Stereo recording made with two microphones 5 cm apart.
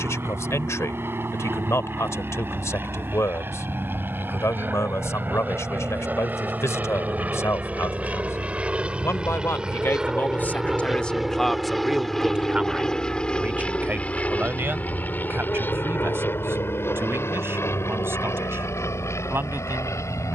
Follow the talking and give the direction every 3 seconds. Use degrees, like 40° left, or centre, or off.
70° left, 70° left, 70° left, 30° left, 30° right, 50° right, 50° right.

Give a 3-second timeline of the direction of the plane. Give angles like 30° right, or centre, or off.
50° right, 50° right, 30° right, 10° right, 20° left, 40° left, 60° left.